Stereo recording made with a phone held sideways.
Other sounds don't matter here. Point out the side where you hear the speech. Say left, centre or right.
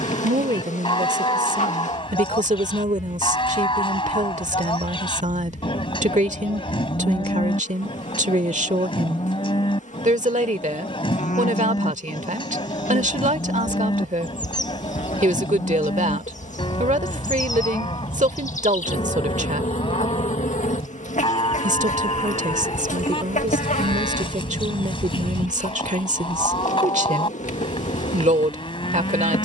right.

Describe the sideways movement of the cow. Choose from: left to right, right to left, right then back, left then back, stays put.
stays put.